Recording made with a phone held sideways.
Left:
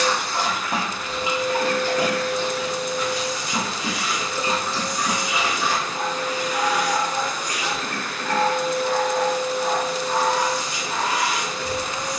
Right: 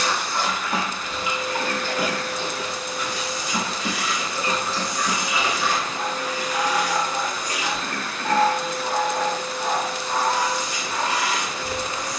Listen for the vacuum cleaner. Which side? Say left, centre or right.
left.